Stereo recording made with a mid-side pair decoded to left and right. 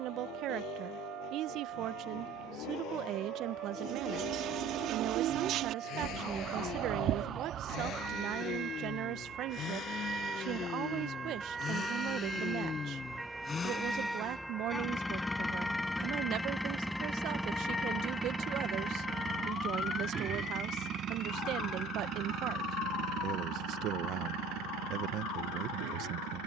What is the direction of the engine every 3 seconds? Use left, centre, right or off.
left, left, left, left, left, centre, right, right, right.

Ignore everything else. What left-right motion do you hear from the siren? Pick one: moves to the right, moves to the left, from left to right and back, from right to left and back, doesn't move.
moves to the left.